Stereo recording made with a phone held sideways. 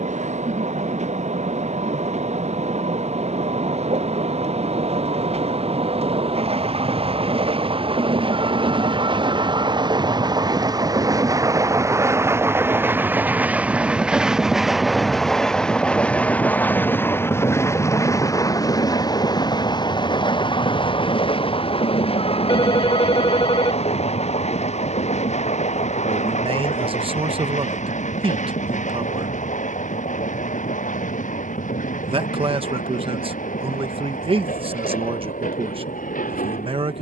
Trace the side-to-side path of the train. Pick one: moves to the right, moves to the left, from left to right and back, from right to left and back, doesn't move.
moves to the left.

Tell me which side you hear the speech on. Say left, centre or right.
right.